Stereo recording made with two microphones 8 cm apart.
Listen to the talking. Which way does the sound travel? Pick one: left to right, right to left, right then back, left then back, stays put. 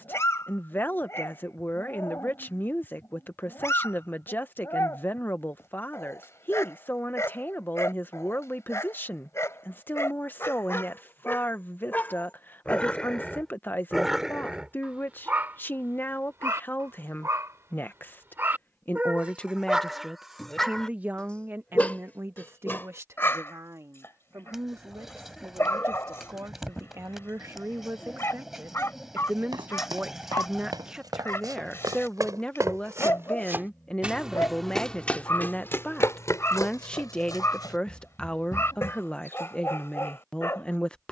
right then back.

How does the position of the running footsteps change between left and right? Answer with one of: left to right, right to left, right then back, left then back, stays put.
right to left.